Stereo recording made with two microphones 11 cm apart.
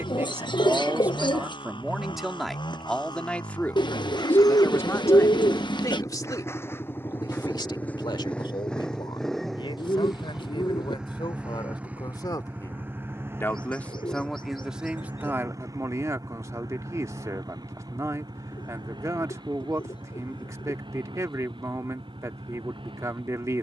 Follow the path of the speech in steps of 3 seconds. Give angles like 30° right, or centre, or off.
10° right, 20° left, 40° left, 50° left, 20° left, 30° right, 30° right, 30° right.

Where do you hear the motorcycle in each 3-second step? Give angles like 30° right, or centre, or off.
50° left, 40° left, 20° left, centre, 20° right, 30° right, 40° right, 50° right.